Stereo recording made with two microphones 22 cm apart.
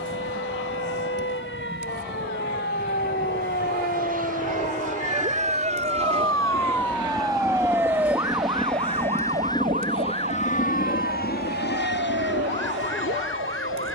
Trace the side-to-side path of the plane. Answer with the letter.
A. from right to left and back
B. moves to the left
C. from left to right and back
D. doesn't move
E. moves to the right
B.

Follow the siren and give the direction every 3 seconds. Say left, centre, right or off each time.
left, left, centre, right, right.